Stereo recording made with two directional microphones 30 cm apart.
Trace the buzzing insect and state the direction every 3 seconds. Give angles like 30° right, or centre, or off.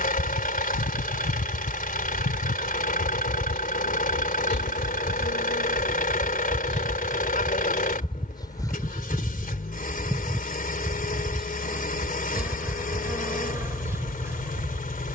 40° left, 30° left, 20° left, centre, 10° right.